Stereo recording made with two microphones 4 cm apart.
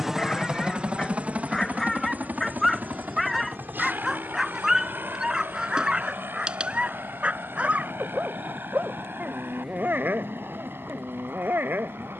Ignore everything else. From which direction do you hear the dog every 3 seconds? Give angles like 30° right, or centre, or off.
10° left, 10° right, 30° right, 50° right.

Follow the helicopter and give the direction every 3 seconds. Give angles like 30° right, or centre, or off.
30° right, 50° right, 60° right, 60° right.